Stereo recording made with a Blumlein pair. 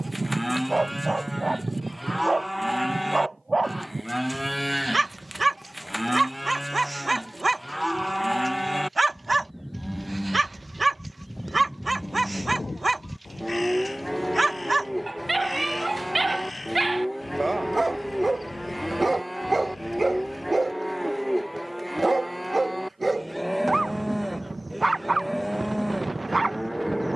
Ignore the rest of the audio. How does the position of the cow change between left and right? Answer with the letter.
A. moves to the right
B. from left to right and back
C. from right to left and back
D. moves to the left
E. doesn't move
E.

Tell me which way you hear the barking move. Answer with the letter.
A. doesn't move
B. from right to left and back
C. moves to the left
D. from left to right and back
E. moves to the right
A.